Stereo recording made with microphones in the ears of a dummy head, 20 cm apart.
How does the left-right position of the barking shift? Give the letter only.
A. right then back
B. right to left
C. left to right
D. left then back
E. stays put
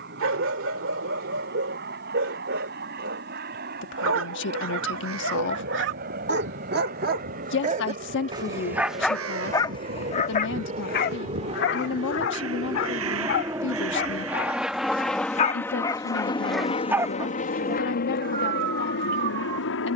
D.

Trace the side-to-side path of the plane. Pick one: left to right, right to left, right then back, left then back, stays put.
right to left.